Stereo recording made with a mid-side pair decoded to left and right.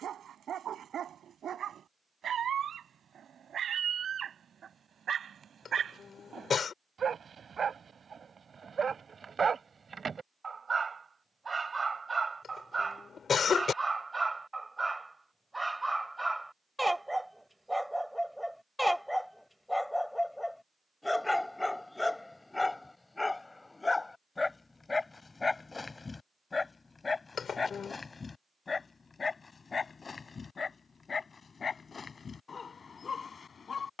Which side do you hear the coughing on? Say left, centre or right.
left.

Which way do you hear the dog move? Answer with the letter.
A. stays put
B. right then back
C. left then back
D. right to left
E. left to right
D.